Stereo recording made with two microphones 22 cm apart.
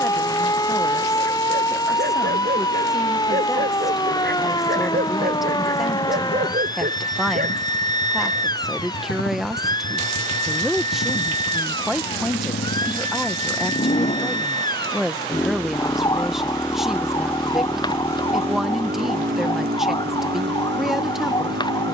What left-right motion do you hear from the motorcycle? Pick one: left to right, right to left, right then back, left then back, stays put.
left to right.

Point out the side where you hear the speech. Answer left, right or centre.
centre.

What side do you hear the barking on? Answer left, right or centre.
right.